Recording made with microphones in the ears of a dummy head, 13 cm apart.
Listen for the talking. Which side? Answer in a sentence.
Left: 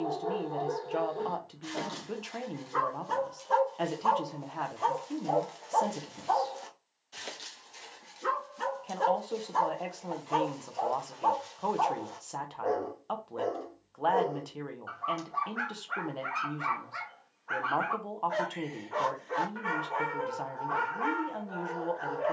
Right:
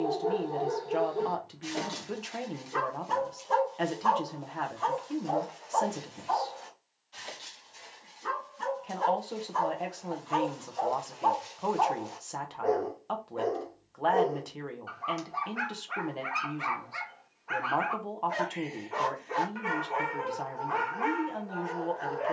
In this clip you hear the talking in the centre.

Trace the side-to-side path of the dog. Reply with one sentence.
In this clip you hear the dog move from right to left and back again.